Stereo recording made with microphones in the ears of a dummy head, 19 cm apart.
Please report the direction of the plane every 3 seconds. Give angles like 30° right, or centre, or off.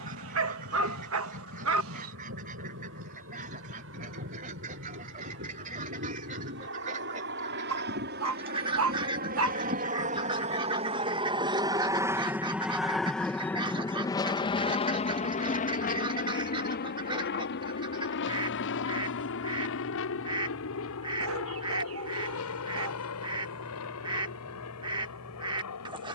70° right, 70° right, 60° right, 30° right, 10° left, 40° left, 60° left, 70° left, 70° left.